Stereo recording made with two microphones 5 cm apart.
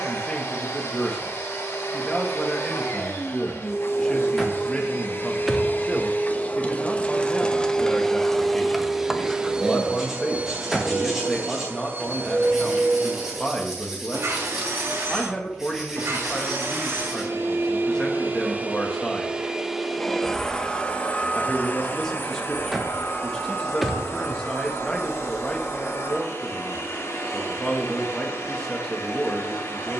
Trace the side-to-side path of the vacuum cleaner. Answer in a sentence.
In this clip you hear the vacuum cleaner move from left to right and back again.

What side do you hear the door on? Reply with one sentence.
You can hear the door in the centre.